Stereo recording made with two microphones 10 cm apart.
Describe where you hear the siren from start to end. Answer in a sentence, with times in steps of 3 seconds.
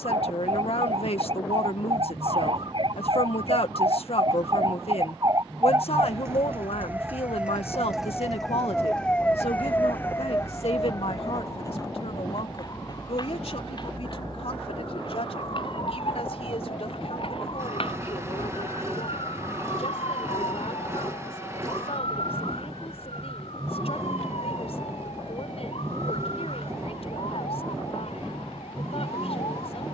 You can hear the siren on the right from 0 s, in the centre from 6 s and on the left from 9 s.